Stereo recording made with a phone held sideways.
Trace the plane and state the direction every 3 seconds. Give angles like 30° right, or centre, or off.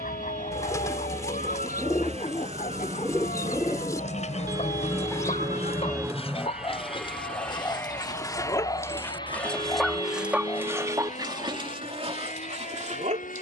60° right, 30° right, 10° left, 40° left, 50° left.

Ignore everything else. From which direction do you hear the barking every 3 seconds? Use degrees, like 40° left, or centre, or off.
60° left, 50° left, 30° left, 10° right, 50° right.